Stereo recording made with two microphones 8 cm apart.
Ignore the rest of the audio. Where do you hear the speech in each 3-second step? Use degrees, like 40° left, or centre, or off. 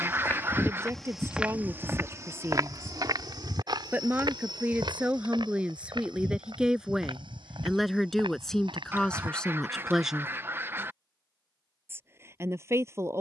30° right, 20° right, centre, centre, 30° right.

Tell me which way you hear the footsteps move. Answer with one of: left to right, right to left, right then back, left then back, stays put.
left to right.